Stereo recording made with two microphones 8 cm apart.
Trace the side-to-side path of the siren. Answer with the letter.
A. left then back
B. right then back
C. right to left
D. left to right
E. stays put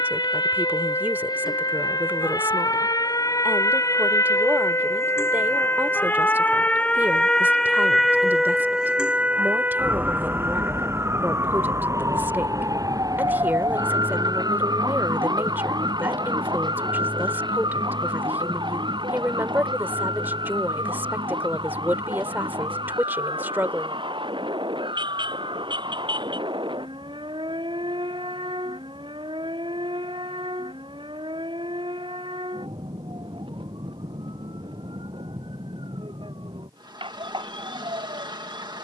D.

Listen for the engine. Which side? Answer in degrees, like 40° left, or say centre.
60° right.